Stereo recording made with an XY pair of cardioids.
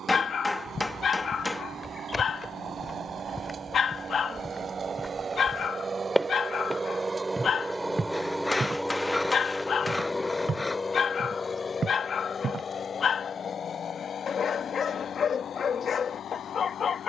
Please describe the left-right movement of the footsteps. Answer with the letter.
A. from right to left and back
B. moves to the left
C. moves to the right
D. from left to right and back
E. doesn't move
C.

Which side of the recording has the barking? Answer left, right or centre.
left.